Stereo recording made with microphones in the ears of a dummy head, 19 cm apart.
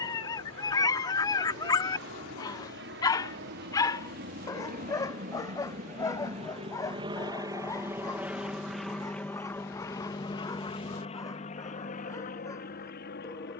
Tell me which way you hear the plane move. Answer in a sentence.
You can hear the plane move to the left.